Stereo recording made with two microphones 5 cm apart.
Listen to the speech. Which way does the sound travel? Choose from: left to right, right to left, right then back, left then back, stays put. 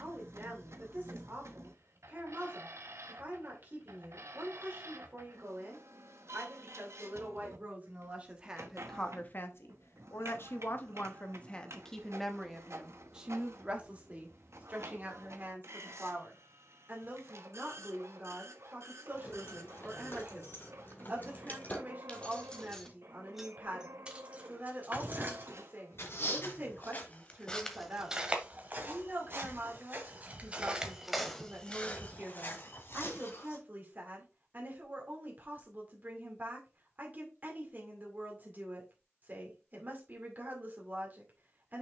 left then back.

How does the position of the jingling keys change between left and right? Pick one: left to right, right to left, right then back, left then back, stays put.
left to right.